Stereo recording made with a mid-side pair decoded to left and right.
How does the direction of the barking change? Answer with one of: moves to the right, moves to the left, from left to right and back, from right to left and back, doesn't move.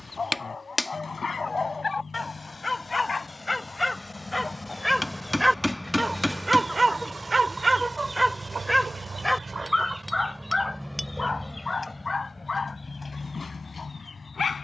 from left to right and back.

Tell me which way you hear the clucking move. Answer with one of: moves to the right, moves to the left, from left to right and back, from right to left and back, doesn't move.
from left to right and back.